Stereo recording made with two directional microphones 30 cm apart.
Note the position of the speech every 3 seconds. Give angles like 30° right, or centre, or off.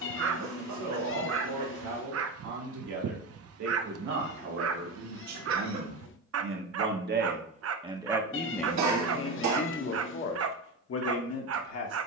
70° right, 60° right, 20° right, 40° left.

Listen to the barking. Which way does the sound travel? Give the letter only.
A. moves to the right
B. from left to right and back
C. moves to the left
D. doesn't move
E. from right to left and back
D.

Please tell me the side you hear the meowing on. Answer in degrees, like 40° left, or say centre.
40° left.